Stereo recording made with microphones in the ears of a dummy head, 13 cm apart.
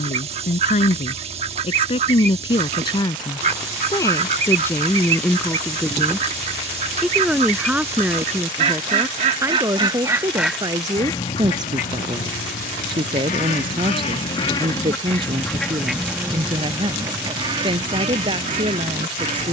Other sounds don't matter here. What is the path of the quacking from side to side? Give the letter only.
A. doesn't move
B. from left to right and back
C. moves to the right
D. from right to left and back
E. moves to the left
D.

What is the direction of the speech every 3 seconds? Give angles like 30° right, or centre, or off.
40° left, 20° left, 10° right, 20° right, 30° right, 30° right, 30° right.